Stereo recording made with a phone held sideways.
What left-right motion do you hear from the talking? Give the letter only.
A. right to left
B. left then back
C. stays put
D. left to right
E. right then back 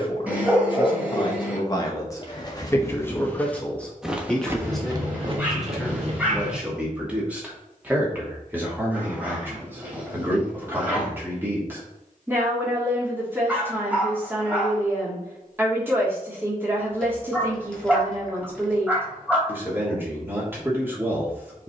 D.